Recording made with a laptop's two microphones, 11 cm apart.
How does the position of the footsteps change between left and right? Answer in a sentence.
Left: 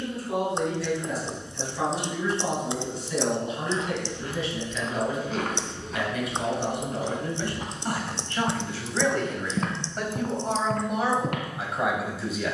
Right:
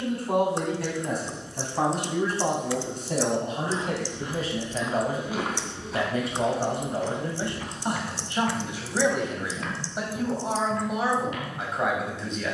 You can hear the footsteps go from the right side to the left.